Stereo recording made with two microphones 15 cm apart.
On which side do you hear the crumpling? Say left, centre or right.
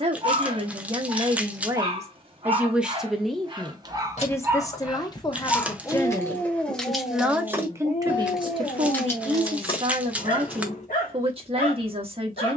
centre.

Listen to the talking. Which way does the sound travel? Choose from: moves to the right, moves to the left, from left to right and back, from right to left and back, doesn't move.
from right to left and back.